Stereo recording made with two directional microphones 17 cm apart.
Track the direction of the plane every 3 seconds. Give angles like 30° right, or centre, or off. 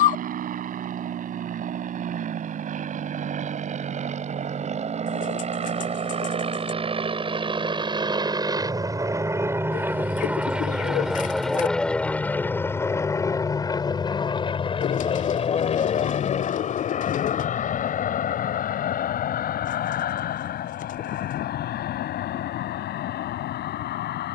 60° right, 50° right, 30° right, 10° right, 20° left, 40° left, 50° left, 60° left.